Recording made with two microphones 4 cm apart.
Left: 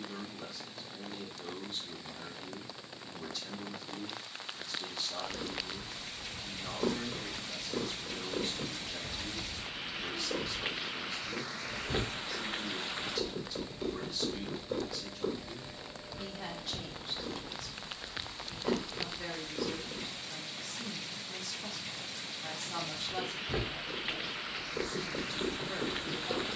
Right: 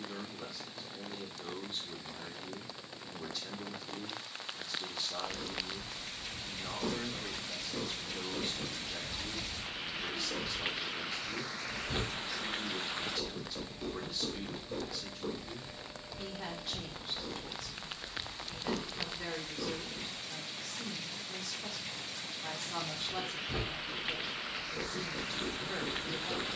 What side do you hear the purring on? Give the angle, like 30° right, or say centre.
30° left.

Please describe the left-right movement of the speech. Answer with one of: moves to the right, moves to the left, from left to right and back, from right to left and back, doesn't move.
doesn't move.